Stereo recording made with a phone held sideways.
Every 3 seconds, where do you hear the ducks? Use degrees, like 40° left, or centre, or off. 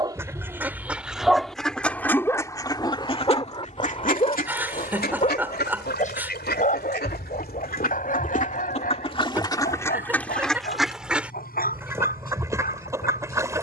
centre, 60° left, 70° left, 10° left, 20° right.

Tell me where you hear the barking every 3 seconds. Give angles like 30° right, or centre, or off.
centre, 40° left, 50° left, 60° left, 60° left.